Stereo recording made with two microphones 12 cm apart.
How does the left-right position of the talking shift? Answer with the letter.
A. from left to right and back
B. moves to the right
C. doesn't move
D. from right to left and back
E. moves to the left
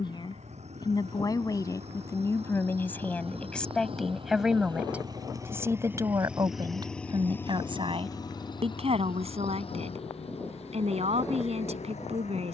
B.